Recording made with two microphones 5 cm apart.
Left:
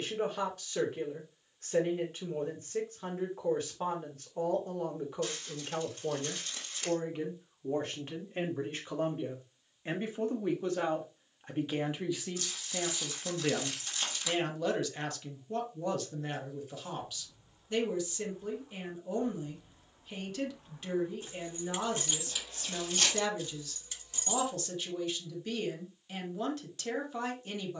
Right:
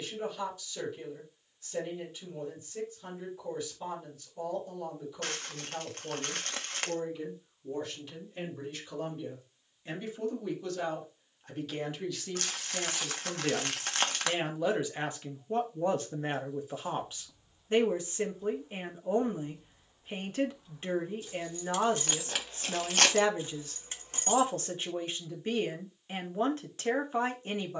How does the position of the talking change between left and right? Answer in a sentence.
In this clip you hear the talking move from left to right.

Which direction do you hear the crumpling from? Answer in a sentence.
You can hear the crumpling on the right.